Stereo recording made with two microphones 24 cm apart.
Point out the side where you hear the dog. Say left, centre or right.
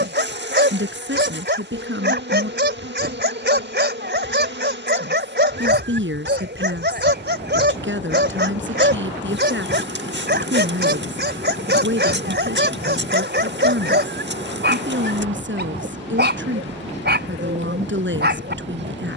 right.